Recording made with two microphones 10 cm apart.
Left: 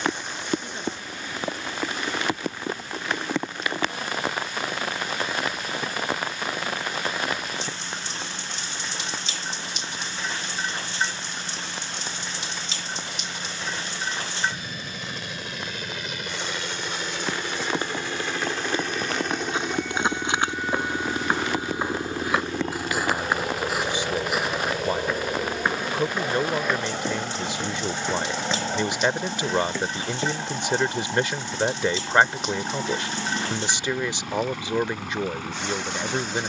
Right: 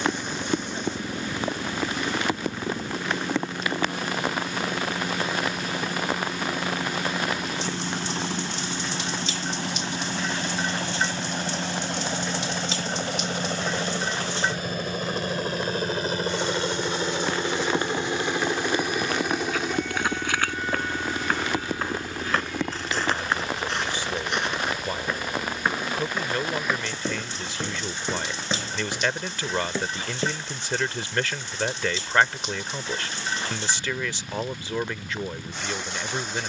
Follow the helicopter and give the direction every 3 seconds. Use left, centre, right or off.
right, right, right, right, right, right, centre, left, left, left, left, left.